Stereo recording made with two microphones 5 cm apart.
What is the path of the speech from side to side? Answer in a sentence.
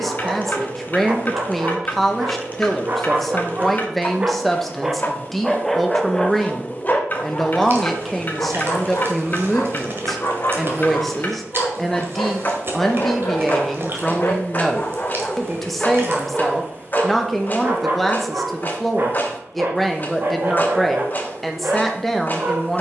You can hear the speech stay in one place.